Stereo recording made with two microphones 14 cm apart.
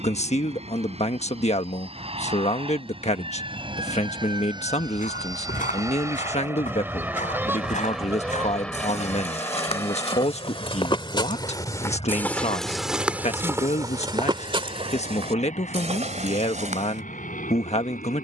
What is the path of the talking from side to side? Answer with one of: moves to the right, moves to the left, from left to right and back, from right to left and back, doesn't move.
doesn't move.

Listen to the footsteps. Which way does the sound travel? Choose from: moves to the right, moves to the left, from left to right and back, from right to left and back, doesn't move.
moves to the right.